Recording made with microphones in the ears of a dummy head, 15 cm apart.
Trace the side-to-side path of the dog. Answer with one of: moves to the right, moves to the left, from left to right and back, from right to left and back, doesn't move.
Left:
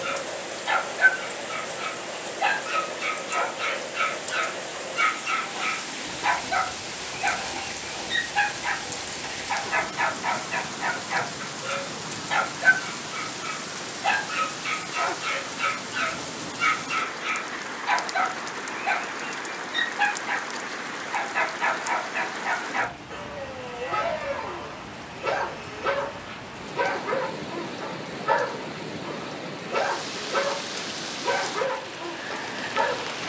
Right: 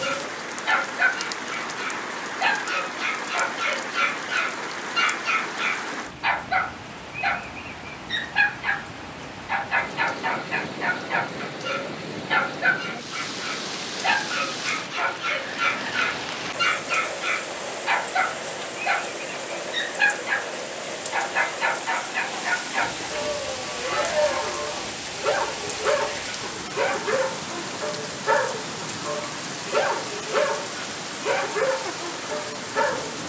doesn't move.